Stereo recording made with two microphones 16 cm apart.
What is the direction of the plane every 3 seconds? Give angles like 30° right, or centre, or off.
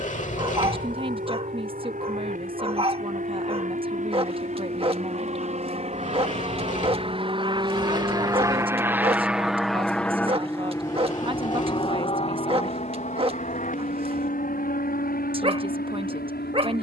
70° right, 60° right, 30° right, 10° left, 50° left, 60° left.